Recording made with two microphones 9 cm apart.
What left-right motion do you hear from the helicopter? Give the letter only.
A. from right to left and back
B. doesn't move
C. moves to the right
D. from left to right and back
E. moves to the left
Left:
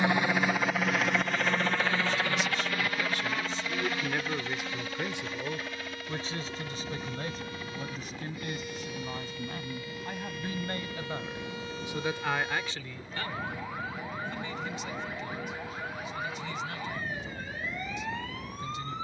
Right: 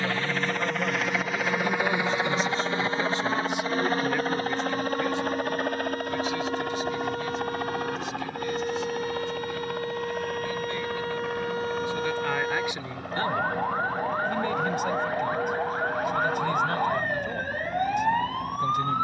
C.